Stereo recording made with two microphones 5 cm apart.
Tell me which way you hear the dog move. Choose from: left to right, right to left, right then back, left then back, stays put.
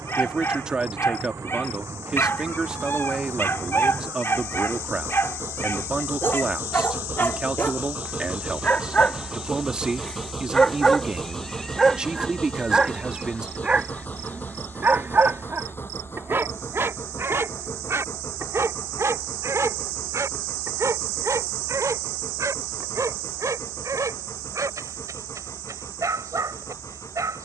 left to right.